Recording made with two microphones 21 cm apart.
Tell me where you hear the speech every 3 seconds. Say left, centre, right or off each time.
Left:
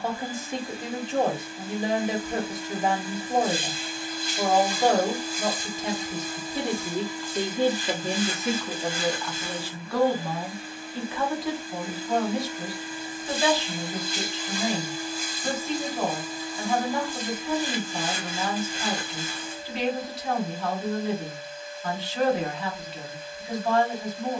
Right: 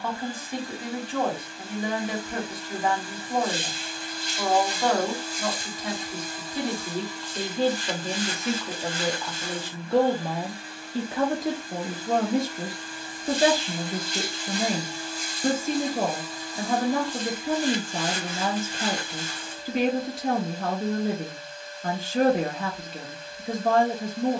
left, left, centre, right, right, right, right, right.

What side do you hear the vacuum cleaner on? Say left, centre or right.
centre.